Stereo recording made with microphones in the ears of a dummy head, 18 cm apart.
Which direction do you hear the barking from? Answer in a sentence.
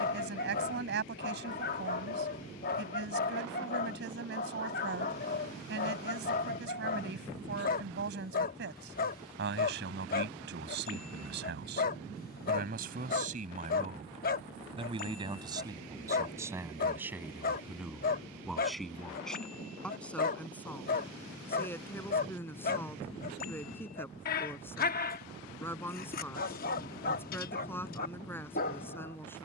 You can hear the barking on the left.